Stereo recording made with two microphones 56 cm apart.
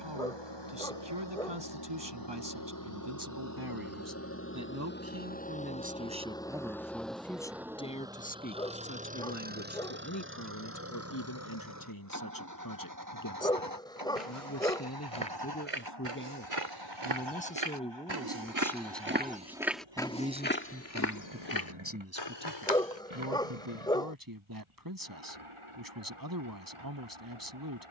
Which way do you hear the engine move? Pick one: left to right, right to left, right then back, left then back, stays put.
left to right.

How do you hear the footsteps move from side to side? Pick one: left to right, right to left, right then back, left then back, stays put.
right to left.